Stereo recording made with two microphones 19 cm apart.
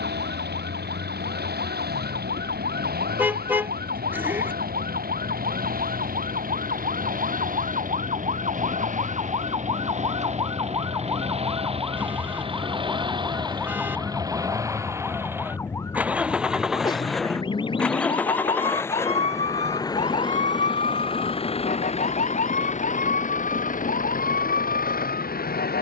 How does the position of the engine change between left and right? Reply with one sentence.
You can hear the engine go from the right side to the left.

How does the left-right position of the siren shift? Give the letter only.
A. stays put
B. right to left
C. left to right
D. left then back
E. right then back
B.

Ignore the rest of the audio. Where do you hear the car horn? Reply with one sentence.
In this clip you hear the car horn in the centre.